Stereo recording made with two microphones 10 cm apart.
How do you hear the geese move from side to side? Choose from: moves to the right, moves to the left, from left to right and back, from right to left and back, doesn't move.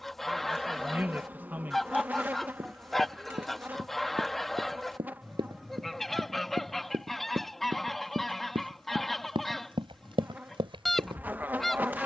doesn't move.